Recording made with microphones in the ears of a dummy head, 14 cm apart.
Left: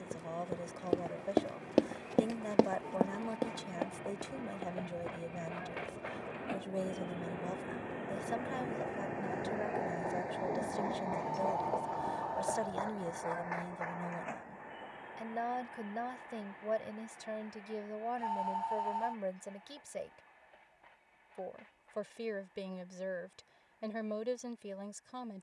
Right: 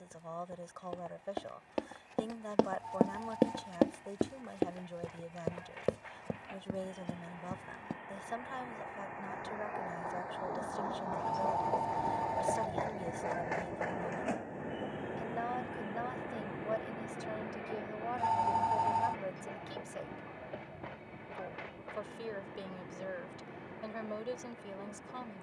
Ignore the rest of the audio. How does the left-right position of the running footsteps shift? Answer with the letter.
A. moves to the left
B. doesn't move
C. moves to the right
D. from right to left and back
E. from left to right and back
C.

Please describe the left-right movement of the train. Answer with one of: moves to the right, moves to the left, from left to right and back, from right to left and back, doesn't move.
moves to the right.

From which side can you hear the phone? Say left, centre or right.
right.